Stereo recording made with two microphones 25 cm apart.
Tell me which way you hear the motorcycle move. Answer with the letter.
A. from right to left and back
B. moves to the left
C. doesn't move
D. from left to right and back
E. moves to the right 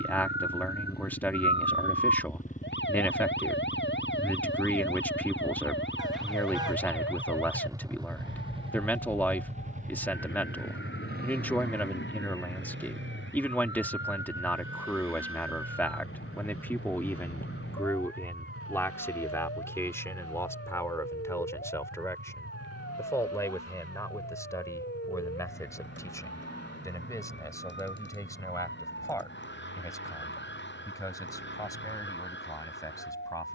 E.